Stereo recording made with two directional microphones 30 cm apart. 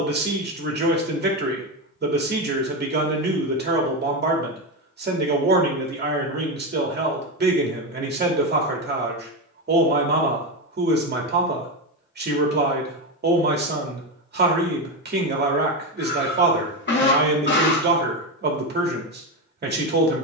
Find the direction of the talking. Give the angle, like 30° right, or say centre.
30° right.